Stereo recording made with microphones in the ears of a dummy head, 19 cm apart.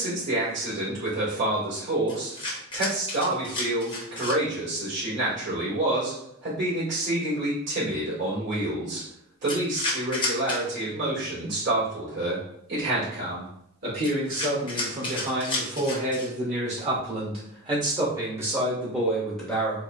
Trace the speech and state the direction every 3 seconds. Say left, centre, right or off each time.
right, right, right, right, right, right, centre.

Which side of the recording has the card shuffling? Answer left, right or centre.
left.